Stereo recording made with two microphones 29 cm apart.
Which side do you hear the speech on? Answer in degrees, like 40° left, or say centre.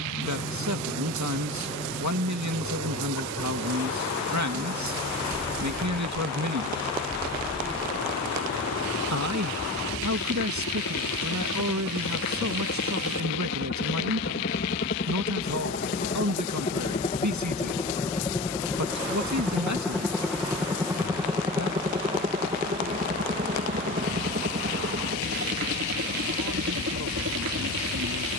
70° right.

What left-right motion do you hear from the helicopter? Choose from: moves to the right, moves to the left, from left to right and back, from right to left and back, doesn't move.
moves to the right.